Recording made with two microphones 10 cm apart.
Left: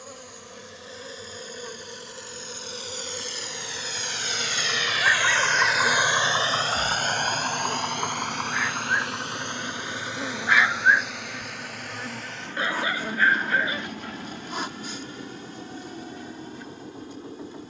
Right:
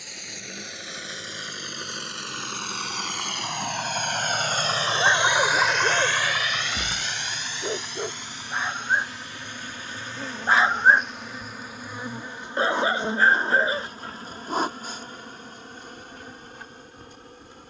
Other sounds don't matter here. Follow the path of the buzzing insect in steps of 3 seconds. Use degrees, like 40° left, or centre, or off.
70° left, 60° left, 40° left, 10° left, 30° right, 50° right.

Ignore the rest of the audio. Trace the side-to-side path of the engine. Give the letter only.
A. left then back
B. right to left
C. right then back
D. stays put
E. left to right
B.